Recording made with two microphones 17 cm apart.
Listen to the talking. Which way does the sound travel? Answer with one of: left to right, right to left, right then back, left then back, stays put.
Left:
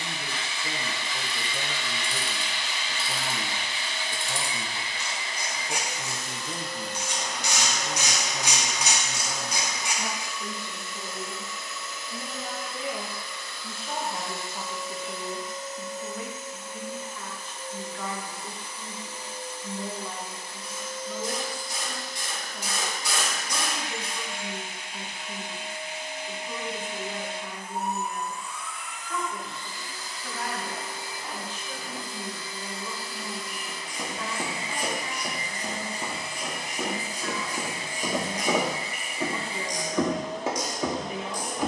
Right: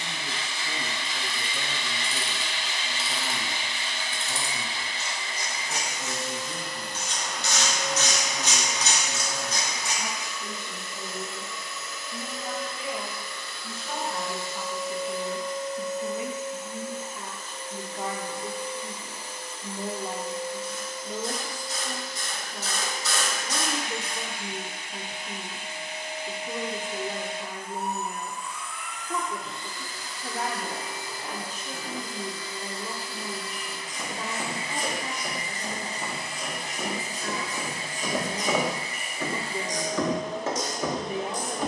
left to right.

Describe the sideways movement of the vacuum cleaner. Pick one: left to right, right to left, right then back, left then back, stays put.
stays put.